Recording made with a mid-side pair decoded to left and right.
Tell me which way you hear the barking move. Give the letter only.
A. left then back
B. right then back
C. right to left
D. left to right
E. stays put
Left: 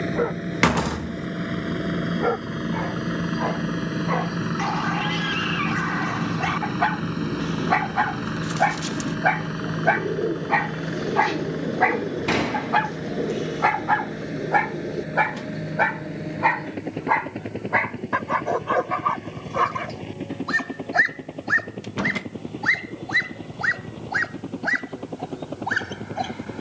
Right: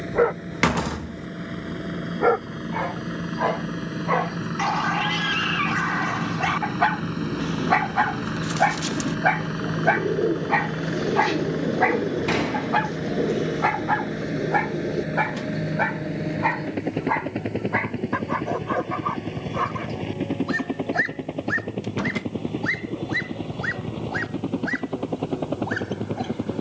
C.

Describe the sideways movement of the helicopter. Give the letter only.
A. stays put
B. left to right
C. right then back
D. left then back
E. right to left
B.